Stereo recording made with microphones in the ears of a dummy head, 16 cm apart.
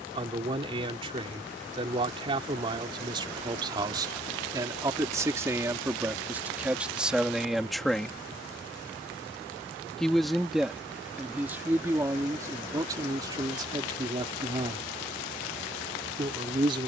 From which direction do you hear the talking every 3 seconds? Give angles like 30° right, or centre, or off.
30° right, 20° right, centre, 10° right, 20° right, 30° right.